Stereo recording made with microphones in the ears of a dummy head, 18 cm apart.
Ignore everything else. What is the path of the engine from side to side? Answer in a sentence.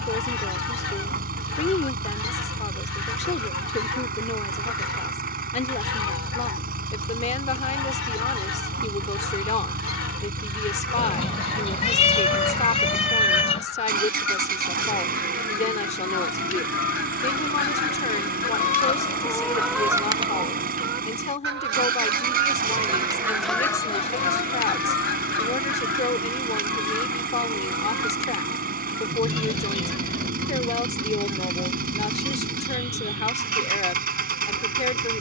You can hear the engine stay put.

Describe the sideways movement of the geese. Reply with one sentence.
You can hear the geese move from left to right and back again.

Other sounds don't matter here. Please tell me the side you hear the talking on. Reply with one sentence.
In this clip you hear the talking on the left.